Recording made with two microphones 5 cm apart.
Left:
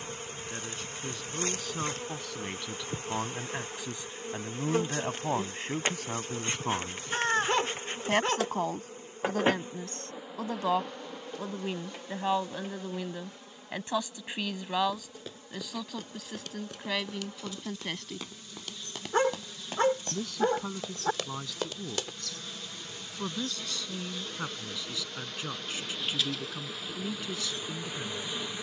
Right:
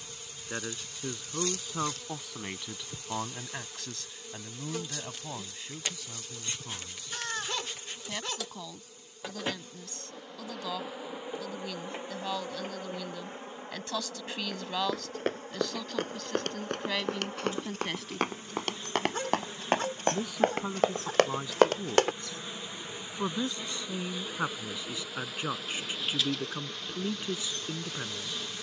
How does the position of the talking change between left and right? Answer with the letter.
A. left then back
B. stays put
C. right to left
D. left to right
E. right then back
A.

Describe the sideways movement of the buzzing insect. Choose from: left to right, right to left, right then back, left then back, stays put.
right then back.